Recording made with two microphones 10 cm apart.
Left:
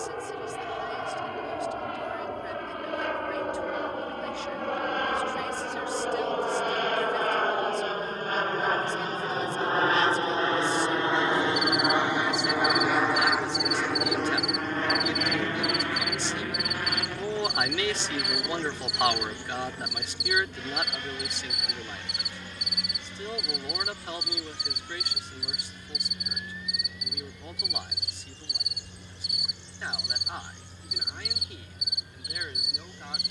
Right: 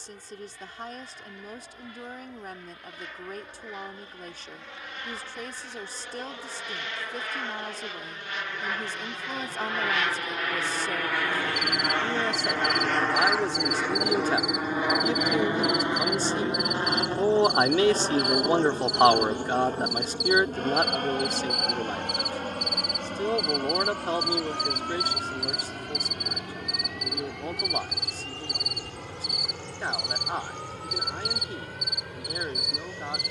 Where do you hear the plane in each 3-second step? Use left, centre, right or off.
left, left, left, left, centre, right, right, right, right, right, right.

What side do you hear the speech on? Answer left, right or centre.
right.